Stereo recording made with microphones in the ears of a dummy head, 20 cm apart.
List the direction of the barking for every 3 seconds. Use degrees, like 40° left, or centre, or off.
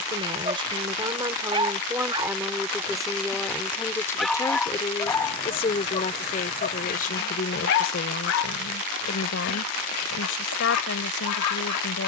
20° right, centre, 50° left, 80° left.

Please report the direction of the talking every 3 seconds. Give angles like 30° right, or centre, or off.
10° right, 10° left, 40° left, 60° left.